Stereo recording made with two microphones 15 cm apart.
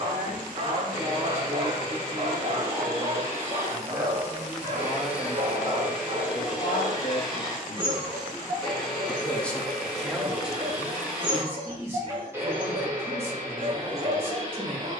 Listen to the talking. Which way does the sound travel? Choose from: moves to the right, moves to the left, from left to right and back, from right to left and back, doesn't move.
from right to left and back.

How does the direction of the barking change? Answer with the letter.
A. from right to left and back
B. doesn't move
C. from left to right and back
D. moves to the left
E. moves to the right
B.